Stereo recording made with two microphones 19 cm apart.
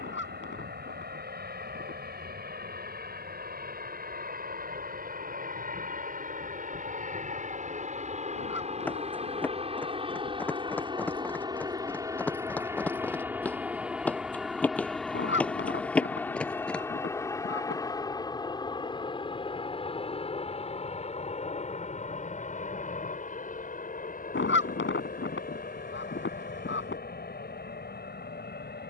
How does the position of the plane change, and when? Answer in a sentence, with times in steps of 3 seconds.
In this clip you hear the plane on the right from 0 s, in the centre from 12 s and on the left from 18 s.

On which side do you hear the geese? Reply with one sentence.
In this clip you hear the geese on the left.